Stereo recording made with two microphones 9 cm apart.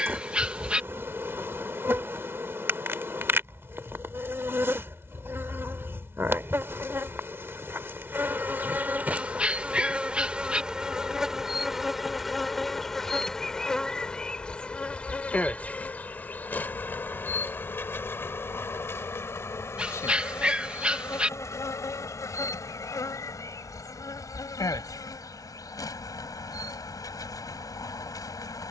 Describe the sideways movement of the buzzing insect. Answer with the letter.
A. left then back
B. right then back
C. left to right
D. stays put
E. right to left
E.